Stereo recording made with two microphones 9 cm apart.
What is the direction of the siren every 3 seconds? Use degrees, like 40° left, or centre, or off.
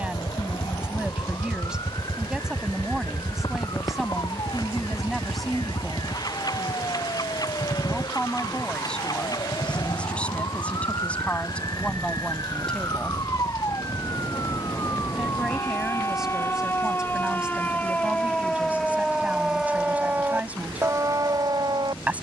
50° left, 50° left, 50° left, 50° left, 40° left, 30° left, centre, 40° right.